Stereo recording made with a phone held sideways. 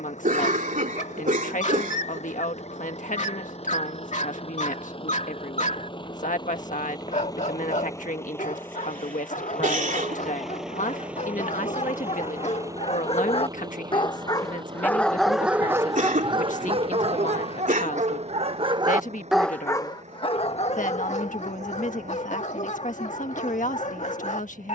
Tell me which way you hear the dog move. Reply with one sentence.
In this clip you hear the dog move from left to right and back again.